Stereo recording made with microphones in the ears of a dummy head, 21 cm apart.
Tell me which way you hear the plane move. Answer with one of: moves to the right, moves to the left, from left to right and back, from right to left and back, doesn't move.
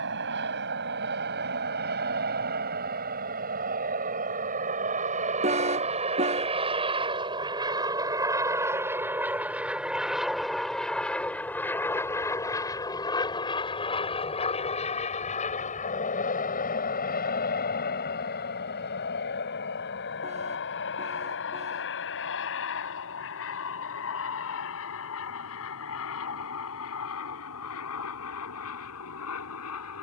moves to the left.